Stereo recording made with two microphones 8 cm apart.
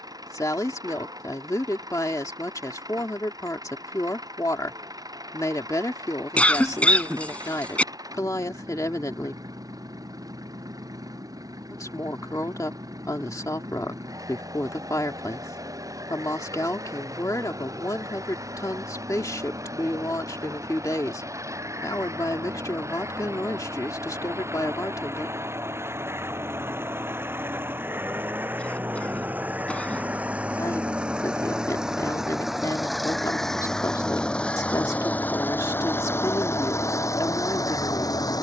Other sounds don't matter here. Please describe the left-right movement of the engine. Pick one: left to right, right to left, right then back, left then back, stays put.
right to left.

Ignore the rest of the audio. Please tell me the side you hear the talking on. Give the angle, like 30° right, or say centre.
50° left.